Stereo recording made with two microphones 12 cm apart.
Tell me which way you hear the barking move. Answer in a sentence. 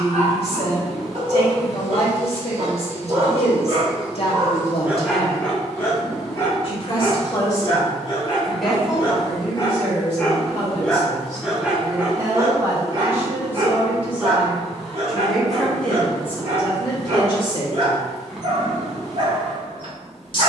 You can hear the barking go left and come back.